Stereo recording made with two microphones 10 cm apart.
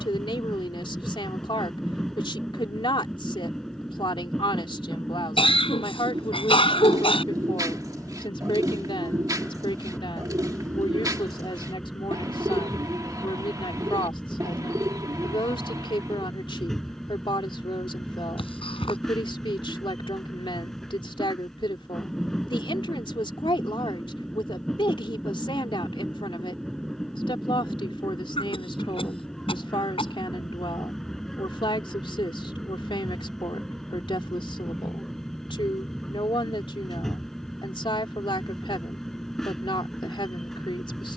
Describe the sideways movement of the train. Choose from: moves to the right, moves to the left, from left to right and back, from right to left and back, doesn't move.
doesn't move.